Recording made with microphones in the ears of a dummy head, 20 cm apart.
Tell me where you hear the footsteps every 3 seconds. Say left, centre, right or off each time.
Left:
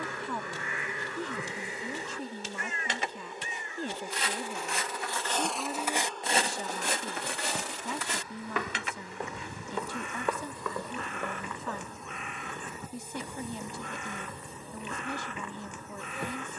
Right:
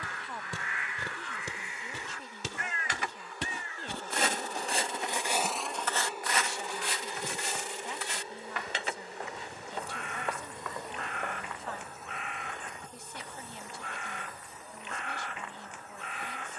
right, right, left, left, off, off.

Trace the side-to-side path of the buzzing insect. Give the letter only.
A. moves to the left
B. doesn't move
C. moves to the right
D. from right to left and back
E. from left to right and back
E.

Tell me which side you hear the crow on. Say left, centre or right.
left.